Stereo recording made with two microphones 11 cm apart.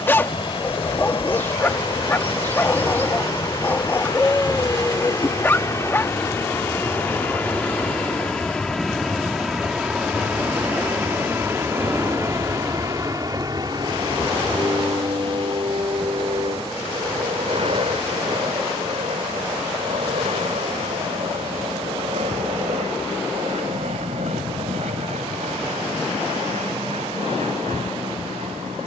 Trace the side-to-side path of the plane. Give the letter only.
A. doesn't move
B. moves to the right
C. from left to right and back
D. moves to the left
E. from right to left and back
B.